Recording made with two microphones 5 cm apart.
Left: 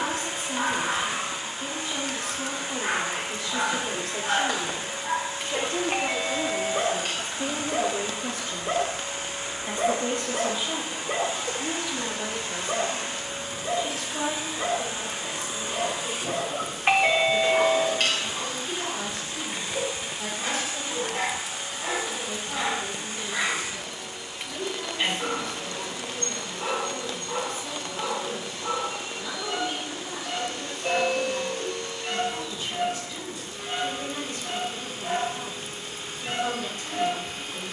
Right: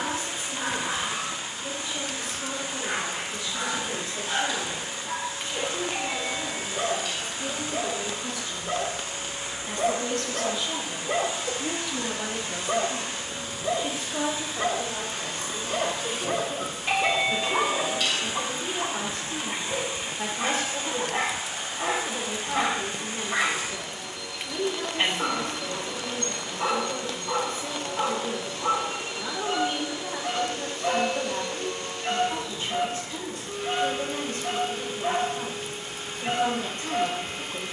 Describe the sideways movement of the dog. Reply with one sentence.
In this clip you hear the dog move to the right.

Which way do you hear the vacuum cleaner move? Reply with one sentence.
In this clip you hear the vacuum cleaner travel towards the right.